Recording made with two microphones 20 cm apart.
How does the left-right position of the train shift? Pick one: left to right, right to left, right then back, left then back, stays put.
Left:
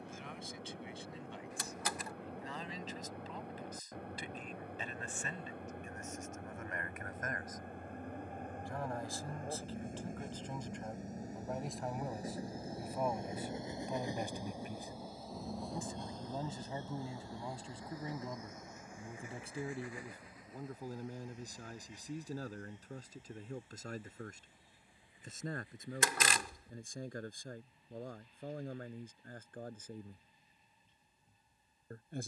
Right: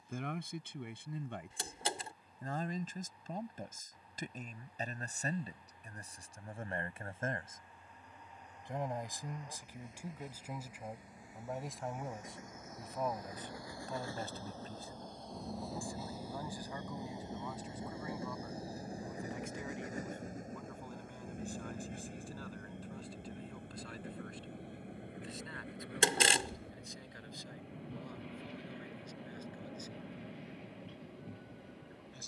left to right.